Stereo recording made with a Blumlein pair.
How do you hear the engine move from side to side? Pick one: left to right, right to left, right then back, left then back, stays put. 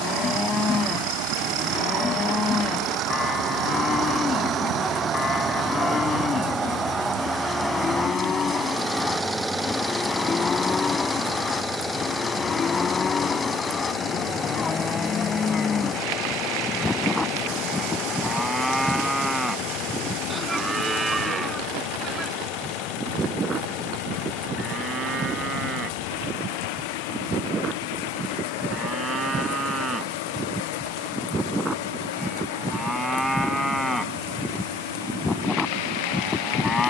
right to left.